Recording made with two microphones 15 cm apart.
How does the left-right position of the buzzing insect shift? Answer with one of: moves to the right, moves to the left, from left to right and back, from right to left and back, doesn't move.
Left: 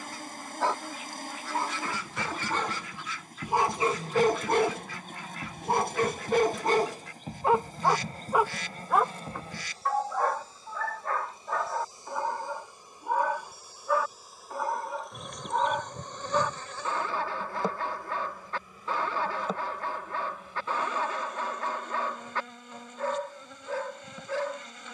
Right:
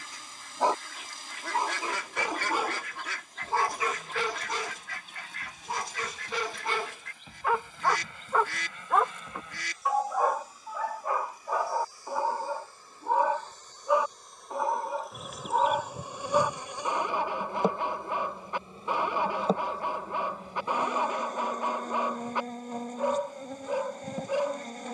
moves to the right.